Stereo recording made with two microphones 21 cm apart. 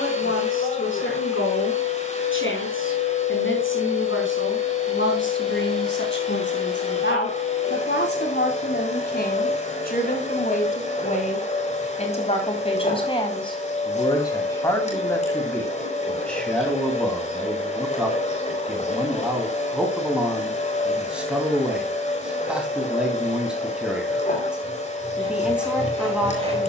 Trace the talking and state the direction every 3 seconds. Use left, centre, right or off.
left, left, left, left, left, centre, centre, centre, centre.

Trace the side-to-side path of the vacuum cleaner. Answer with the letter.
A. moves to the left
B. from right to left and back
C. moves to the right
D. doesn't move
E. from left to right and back
D.